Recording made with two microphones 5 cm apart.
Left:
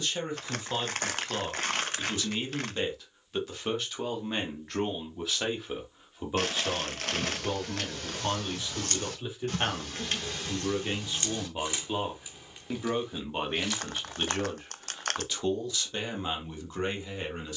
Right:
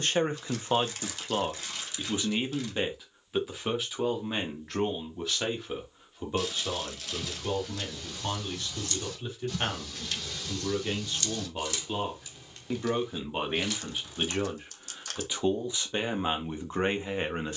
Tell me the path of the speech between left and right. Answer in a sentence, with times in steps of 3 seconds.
You can hear the speech on the right from 0 s, in the centre from 3 s and on the right from 15 s.